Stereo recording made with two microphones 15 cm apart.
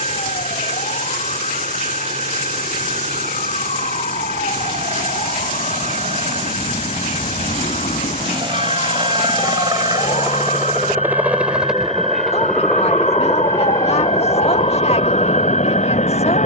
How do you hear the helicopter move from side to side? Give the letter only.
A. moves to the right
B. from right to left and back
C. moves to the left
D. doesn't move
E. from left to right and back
C.